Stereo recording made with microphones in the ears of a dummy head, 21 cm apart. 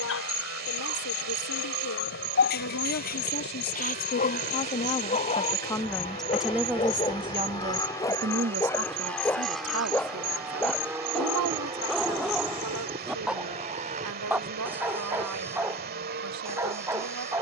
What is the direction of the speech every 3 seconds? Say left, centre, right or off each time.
left, left, right, right, right, right.